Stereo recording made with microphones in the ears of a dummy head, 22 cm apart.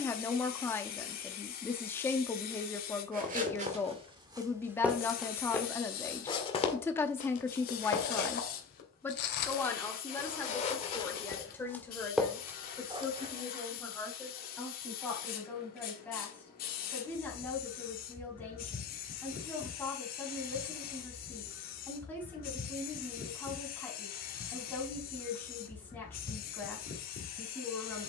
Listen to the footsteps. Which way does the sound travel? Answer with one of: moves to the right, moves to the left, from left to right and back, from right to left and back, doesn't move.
from right to left and back.